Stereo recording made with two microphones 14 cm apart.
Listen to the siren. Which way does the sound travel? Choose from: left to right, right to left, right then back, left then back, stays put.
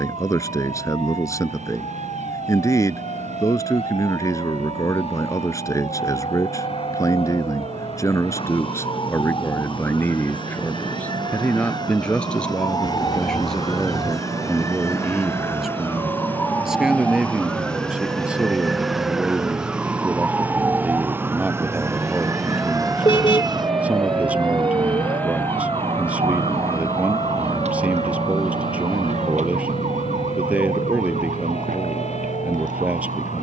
left to right.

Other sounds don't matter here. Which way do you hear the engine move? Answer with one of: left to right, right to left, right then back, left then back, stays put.
right to left.